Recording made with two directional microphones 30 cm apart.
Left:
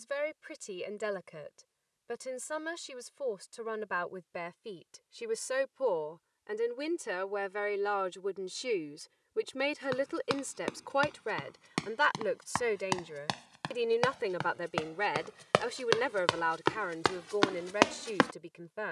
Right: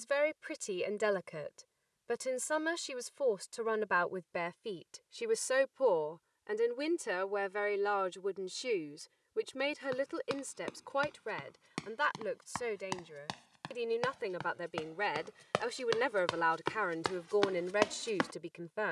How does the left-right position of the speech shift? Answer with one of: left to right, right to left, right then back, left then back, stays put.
left then back.